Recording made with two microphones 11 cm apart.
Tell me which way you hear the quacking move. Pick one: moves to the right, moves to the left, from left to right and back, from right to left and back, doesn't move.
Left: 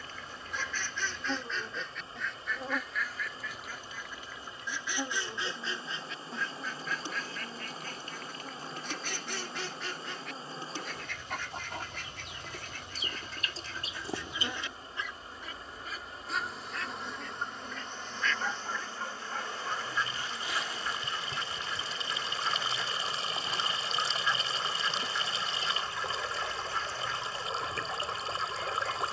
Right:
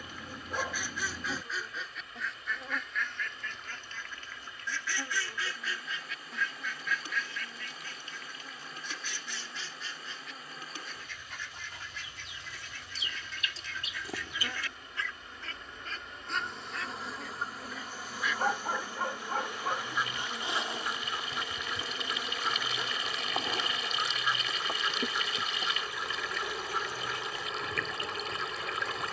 from right to left and back.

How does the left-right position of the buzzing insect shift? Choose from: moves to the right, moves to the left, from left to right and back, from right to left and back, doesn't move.
moves to the right.